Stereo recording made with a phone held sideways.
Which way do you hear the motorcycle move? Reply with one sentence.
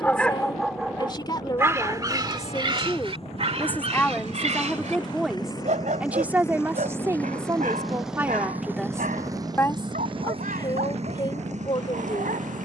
In this clip you hear the motorcycle travel towards the right.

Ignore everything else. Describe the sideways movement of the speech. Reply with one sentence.
In this clip you hear the speech go right and come back.